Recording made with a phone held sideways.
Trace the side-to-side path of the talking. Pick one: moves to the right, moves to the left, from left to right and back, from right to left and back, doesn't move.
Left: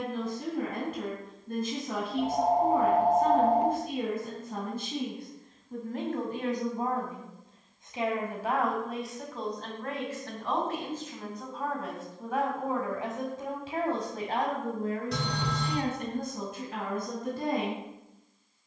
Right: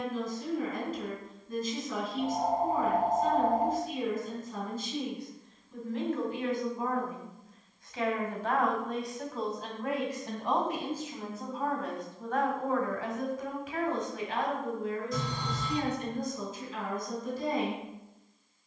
from left to right and back.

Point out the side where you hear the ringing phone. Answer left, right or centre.
left.